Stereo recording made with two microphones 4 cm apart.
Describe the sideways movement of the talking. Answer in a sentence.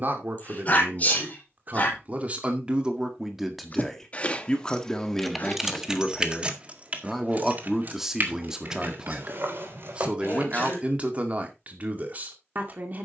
In this clip you hear the talking go left and come back.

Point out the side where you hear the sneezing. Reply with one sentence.
You can hear the sneezing on the left.